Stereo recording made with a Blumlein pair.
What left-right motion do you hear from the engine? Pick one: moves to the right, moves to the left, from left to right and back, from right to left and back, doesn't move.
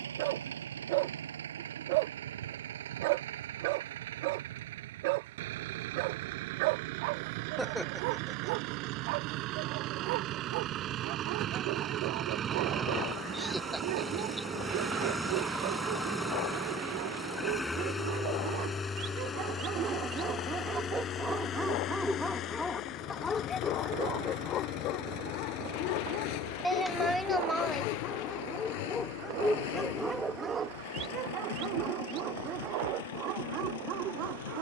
moves to the left.